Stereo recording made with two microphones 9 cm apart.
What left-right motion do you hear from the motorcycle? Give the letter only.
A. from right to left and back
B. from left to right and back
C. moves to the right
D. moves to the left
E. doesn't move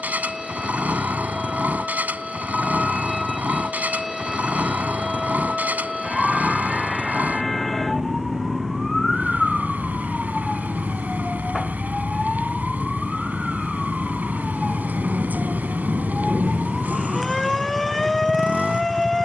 E.